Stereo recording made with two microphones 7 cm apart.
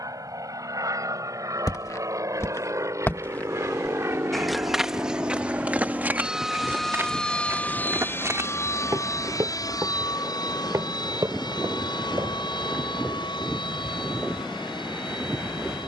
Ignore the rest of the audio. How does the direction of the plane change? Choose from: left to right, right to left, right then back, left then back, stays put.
right to left.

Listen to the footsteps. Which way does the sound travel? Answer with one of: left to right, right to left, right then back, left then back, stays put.
left to right.